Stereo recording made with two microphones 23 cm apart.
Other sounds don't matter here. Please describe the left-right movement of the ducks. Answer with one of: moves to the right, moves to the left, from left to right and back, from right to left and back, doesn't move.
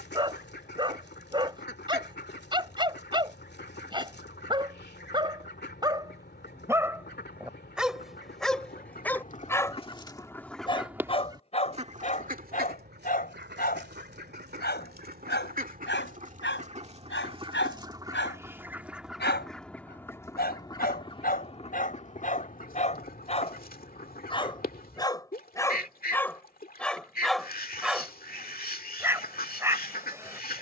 from left to right and back.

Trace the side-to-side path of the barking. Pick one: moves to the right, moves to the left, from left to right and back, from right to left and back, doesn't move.
from right to left and back.